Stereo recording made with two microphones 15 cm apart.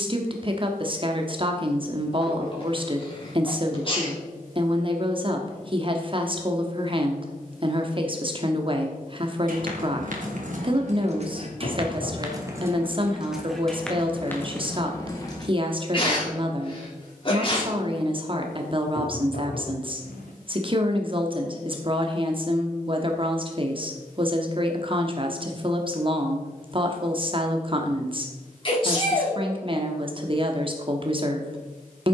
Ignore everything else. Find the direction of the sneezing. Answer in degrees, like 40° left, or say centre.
40° left.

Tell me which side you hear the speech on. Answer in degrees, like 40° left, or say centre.
40° right.